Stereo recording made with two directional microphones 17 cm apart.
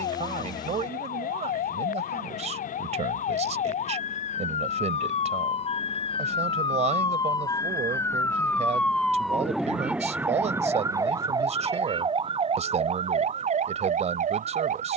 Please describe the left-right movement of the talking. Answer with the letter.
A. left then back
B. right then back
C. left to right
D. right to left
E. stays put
E.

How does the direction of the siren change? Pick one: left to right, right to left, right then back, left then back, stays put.
left to right.